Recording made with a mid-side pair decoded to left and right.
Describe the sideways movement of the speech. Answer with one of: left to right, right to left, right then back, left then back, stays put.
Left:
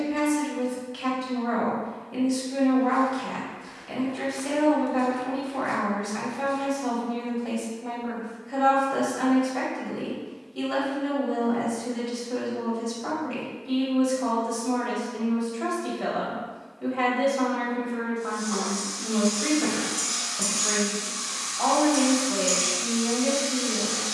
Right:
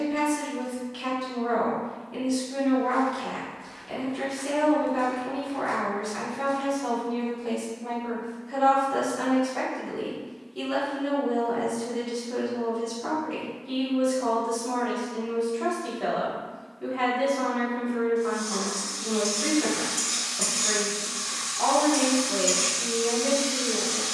stays put.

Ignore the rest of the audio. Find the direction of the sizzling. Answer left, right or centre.
right.